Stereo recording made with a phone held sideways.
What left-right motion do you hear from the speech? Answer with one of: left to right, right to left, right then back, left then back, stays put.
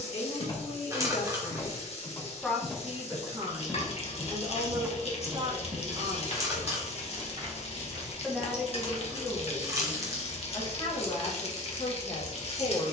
right then back.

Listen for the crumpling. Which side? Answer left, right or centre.
right.